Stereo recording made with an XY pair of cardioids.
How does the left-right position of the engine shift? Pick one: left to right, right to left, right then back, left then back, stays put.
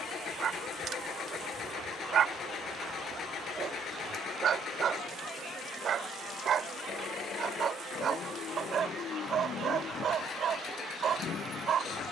stays put.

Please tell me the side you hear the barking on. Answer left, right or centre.
right.